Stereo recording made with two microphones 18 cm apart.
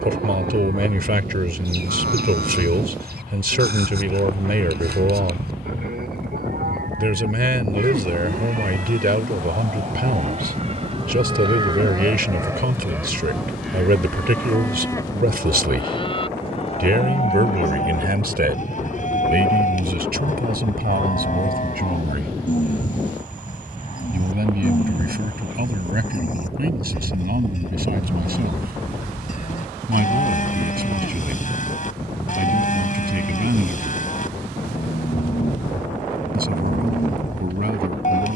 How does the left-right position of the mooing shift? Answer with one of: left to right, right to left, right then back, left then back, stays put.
right to left.